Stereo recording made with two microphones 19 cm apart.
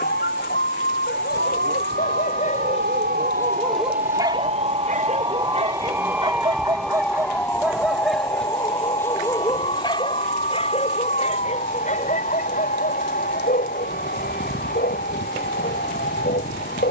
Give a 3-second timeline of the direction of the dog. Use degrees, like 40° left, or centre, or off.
50° left, 20° right, 10° right, 30° left, 50° left, 50° left.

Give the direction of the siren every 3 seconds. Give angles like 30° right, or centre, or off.
70° right, 30° right, 10° left, 40° left, 50° left, 50° left.